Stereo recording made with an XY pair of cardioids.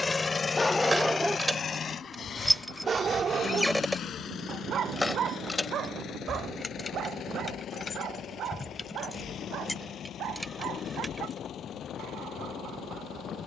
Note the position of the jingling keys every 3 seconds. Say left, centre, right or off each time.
centre, centre, left, centre, off.